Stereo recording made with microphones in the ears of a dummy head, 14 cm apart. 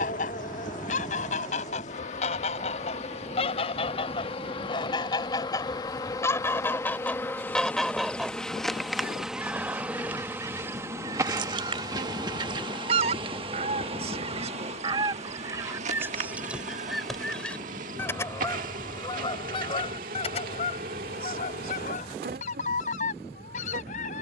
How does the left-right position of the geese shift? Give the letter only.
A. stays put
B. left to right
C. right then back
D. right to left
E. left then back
C.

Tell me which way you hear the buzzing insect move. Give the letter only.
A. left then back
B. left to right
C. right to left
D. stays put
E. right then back
B.